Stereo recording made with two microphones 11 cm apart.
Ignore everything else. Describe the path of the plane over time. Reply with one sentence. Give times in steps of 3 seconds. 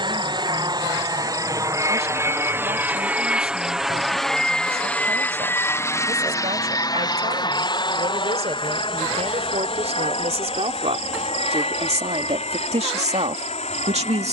You can hear the plane on the right from 0 s, in the centre from 3 s and on the left from 6 s.